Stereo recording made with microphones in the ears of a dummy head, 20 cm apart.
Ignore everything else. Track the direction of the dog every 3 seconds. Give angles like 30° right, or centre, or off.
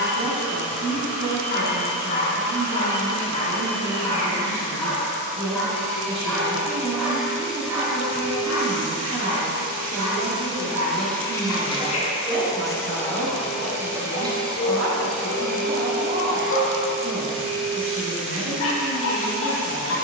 40° left, 10° left, 10° right, 20° right, 20° left, 60° left, 60° left.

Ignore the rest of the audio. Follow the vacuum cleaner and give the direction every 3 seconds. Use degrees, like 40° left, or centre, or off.
70° right, 70° right, 60° right, 20° right, centre, 50° right, 60° right.